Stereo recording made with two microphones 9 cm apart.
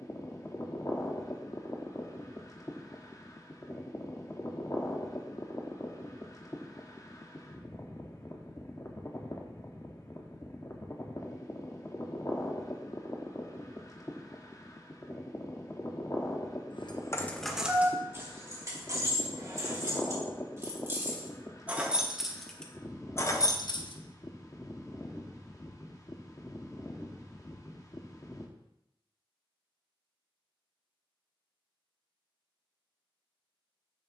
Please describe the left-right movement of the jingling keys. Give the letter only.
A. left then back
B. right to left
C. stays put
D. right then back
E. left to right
D.